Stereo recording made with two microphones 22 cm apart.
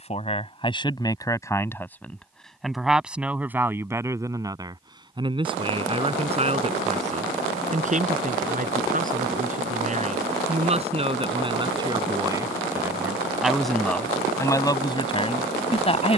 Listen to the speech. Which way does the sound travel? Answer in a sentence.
In this clip you hear the speech go right and come back.